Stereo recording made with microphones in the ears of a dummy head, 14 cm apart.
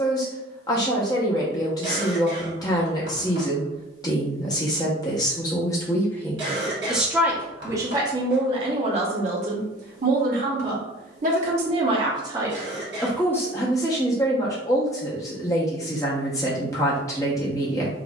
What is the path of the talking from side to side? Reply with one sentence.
You can hear the talking go right and come back.